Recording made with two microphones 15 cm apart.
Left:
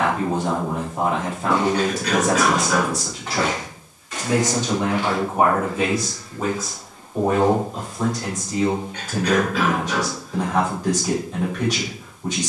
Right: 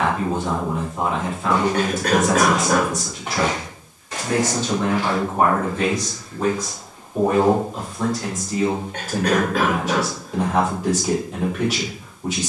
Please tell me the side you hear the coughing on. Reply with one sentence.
In this clip you hear the coughing on the right.